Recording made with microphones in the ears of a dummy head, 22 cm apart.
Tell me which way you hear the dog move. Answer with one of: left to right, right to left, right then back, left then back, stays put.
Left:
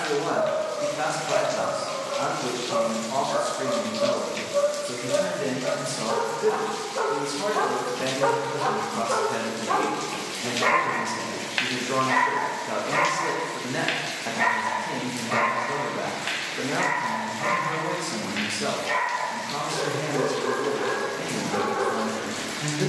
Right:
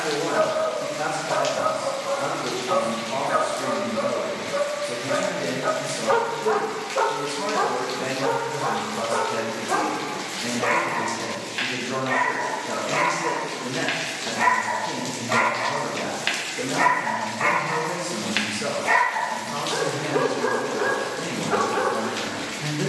left then back.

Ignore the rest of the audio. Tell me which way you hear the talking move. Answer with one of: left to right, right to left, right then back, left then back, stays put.
stays put.